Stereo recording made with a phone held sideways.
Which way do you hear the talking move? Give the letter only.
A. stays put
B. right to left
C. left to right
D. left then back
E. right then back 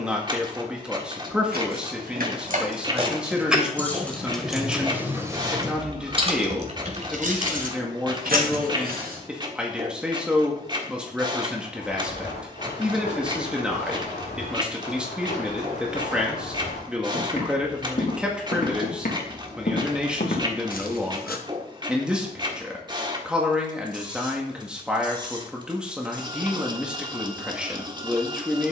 A.